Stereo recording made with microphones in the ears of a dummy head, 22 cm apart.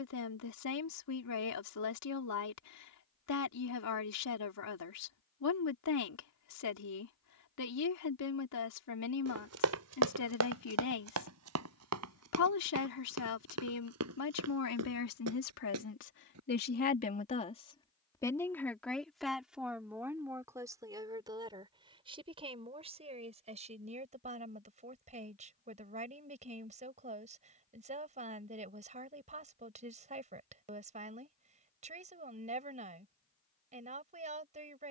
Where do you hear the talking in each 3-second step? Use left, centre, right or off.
left, left, left, left, left, left, centre, right, right, right, right, right.